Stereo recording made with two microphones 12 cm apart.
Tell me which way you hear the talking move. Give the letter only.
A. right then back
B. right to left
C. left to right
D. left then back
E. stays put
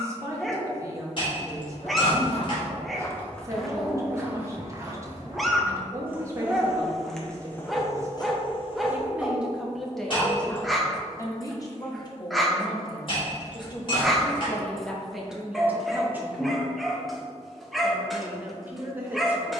D.